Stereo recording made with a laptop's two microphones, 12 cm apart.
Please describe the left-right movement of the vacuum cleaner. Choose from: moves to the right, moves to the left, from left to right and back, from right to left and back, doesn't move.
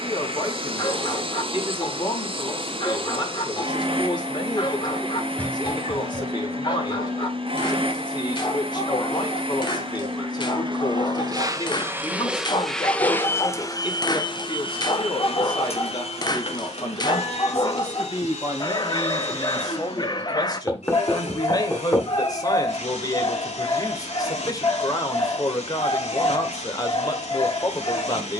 moves to the left.